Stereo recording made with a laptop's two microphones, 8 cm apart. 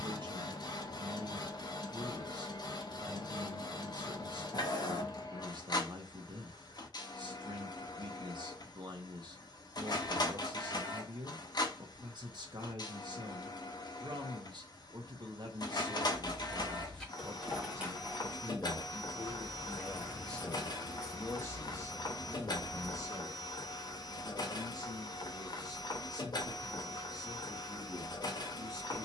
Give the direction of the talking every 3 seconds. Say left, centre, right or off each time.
right, right, right, right, right, right, centre, left, left, left.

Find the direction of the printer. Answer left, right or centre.
left.